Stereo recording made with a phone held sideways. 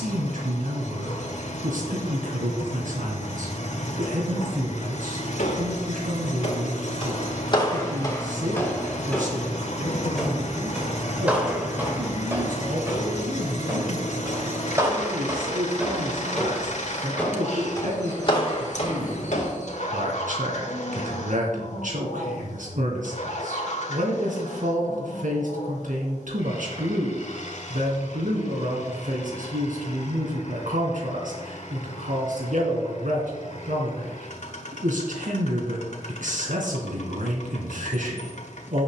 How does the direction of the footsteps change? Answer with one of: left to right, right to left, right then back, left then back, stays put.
right then back.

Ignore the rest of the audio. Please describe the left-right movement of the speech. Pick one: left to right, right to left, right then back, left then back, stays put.
stays put.